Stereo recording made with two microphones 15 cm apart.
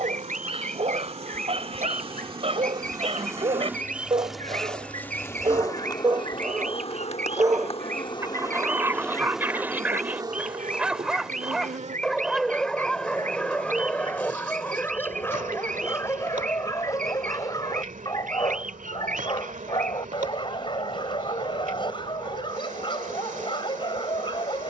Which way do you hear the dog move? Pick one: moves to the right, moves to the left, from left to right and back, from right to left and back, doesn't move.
moves to the left.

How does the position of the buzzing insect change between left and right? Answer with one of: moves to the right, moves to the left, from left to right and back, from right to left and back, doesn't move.
from right to left and back.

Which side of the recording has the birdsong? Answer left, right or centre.
right.